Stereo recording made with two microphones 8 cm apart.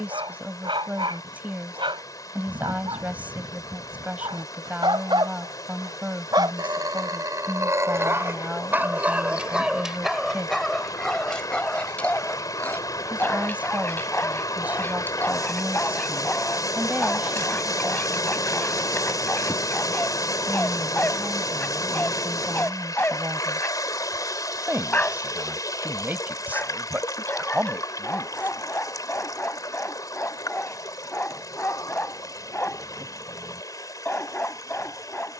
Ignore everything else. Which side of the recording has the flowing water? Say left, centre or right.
left.